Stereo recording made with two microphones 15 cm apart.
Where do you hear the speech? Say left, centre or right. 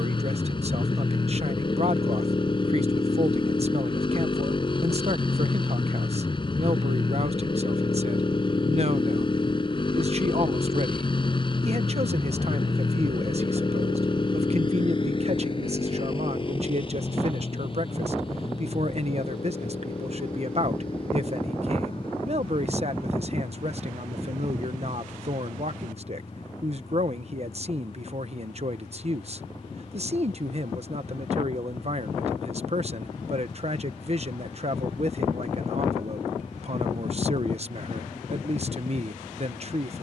right.